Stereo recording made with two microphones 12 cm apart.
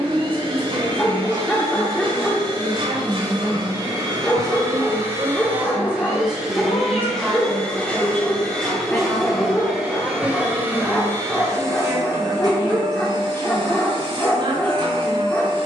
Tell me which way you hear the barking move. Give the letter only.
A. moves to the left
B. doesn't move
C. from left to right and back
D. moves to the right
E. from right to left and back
B.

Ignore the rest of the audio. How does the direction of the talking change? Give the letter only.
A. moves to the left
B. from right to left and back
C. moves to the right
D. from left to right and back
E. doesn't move
B.